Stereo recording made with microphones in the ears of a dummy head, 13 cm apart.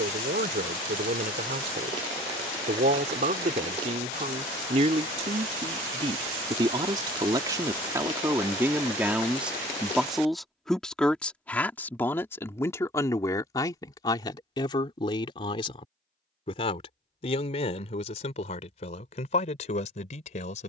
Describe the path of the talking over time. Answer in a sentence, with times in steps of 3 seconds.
In this clip you hear the talking on the right from 0 s, in the centre from 9 s and on the left from 12 s.